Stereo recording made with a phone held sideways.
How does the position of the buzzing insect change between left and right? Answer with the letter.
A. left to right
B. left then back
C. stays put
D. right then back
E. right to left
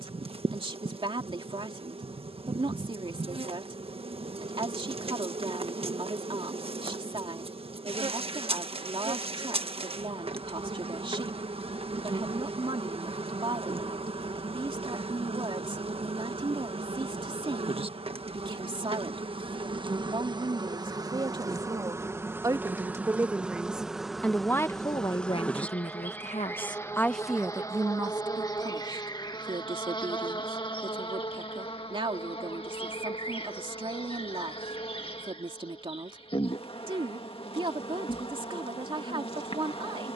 E.